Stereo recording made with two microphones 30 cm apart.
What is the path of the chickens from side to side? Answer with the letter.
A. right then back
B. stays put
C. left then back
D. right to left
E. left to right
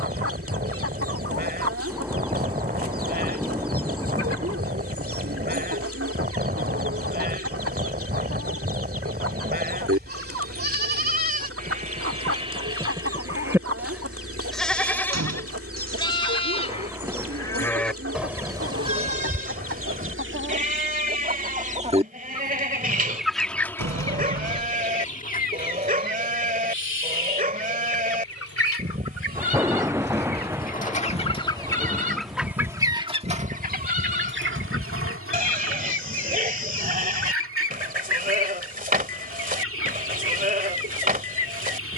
C.